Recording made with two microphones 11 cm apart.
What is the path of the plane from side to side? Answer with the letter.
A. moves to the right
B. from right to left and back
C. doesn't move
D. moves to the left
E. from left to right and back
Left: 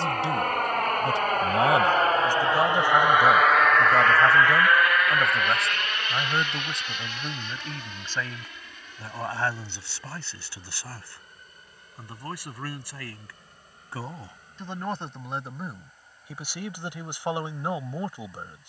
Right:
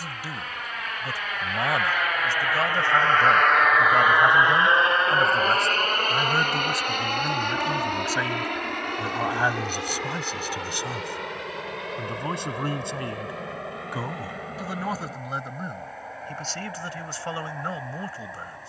A.